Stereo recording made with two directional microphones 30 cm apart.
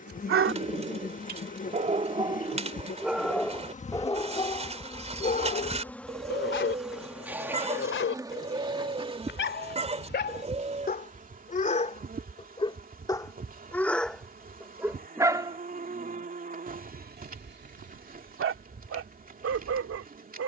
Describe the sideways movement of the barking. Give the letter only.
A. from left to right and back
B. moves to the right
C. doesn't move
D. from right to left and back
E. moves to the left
D.